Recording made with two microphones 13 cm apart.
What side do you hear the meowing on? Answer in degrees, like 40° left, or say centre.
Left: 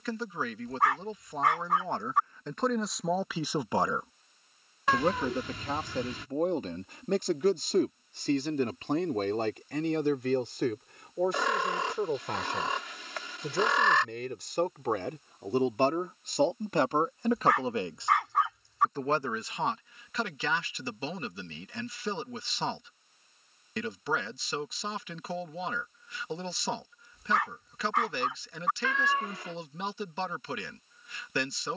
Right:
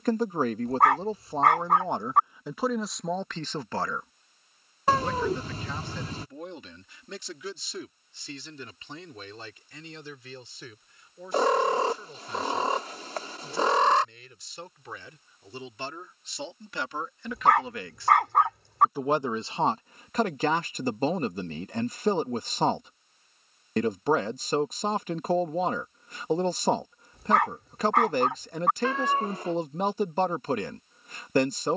40° right.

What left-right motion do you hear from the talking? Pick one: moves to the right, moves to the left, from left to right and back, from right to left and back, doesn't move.
from right to left and back.